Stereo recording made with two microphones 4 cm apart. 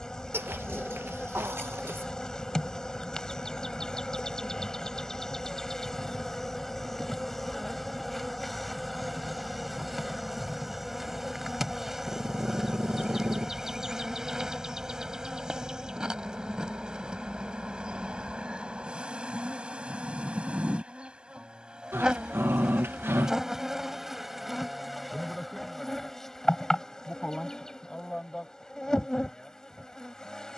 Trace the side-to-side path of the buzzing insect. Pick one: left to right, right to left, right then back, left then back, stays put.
right then back.